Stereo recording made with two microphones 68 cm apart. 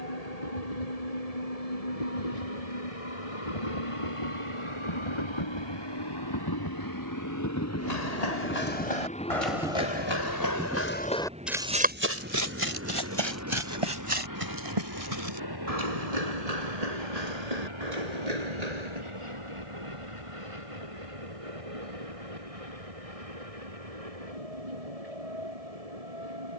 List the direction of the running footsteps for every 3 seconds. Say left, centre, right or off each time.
off, off, left, left, right, right, right, off, off.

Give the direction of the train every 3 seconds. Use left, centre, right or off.
left, left, left, centre, right, right, right, right, right.